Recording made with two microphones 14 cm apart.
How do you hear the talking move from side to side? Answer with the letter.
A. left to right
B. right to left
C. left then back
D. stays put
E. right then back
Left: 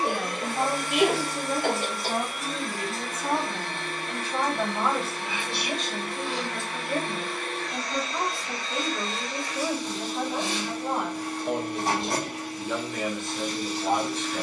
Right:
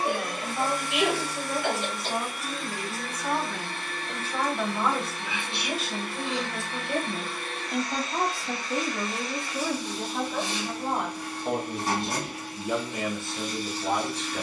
E.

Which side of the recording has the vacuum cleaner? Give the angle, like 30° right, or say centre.
80° left.